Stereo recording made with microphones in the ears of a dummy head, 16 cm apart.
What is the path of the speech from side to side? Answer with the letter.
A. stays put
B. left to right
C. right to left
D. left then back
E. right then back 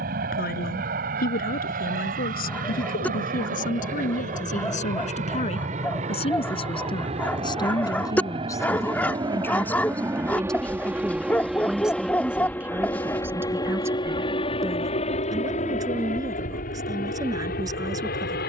B.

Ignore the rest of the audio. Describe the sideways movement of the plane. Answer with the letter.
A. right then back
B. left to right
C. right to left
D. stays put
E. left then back
C.